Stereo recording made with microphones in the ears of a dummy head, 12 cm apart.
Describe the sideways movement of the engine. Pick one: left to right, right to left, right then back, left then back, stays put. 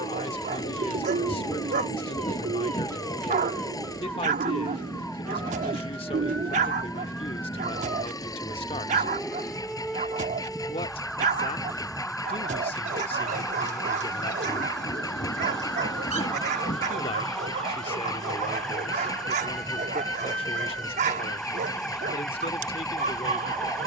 stays put.